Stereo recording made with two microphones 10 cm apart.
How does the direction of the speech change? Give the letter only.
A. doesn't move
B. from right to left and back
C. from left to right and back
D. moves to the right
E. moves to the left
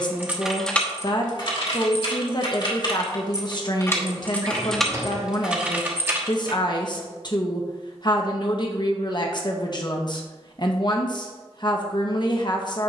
A.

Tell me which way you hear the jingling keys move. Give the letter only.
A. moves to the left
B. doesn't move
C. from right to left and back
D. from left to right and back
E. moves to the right
C.